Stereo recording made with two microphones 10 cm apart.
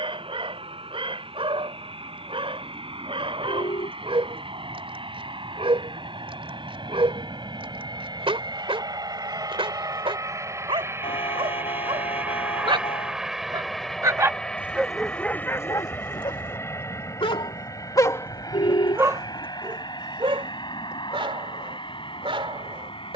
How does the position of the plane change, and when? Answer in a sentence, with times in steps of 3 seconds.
You can hear the plane on the right from 0 s, in the centre from 12 s and on the left from 15 s.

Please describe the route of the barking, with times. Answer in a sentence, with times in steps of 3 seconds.
In this clip you hear the barking on the right from 0 s, on the left from 15 s and on the right from 18 s.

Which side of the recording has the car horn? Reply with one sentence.
In this clip you hear the car horn on the left.